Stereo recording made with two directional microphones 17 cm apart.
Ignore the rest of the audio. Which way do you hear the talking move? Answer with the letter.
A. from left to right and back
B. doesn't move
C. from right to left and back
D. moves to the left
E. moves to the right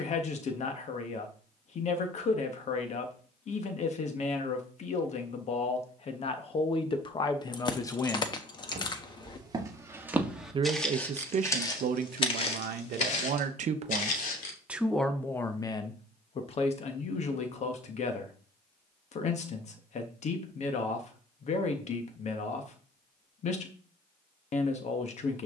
A.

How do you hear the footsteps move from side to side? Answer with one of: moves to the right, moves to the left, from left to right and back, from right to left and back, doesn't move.
moves to the left.